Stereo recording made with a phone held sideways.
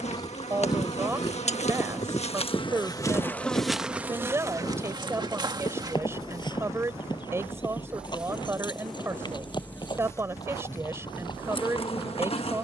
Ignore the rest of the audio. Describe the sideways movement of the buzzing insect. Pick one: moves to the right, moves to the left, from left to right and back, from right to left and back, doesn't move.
from left to right and back.